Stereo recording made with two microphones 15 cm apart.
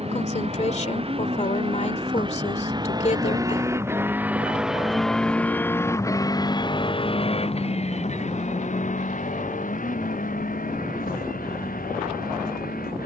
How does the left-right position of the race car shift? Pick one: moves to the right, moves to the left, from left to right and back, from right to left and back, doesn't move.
moves to the left.